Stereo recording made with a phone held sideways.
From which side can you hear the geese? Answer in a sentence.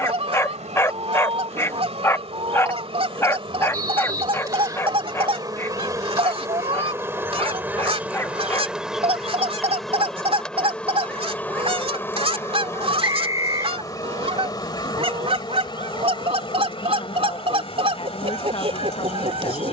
In this clip you hear the geese on the right.